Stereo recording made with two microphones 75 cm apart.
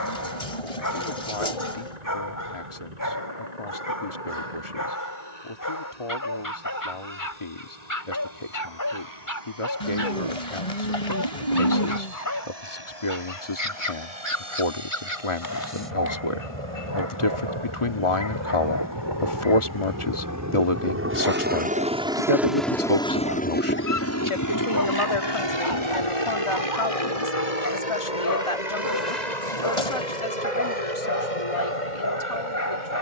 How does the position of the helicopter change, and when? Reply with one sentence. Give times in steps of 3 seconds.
You can hear the helicopter on the right from 0 s, in the centre from 21 s and on the left from 24 s.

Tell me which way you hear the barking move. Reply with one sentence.
In this clip you hear the barking stay in one place.